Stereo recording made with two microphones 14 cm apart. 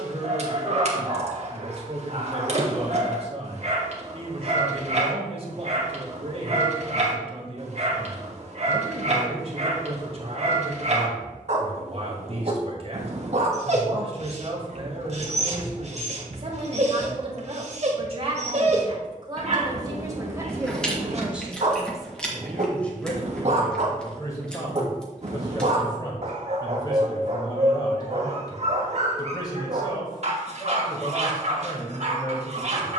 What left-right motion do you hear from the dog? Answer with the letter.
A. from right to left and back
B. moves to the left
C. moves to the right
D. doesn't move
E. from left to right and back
D.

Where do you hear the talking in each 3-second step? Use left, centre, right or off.
right, right, right, right, right, right, right, centre, left, left, left.